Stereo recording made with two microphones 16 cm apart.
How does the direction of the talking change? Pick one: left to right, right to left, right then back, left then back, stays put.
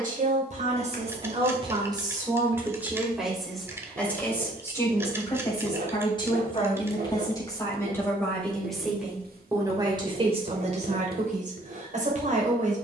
left then back.